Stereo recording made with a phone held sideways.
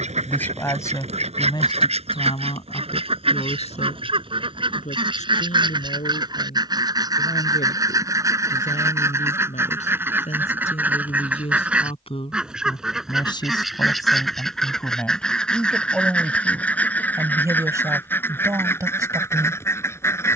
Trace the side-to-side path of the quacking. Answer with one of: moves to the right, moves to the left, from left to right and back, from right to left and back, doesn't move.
moves to the left.